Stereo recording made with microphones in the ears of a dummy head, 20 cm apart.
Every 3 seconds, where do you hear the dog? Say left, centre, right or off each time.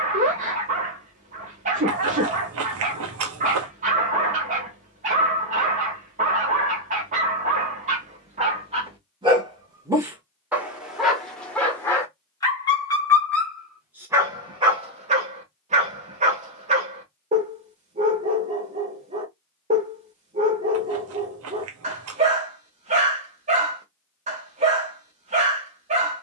right, right, right, centre, centre, right, right, right, right.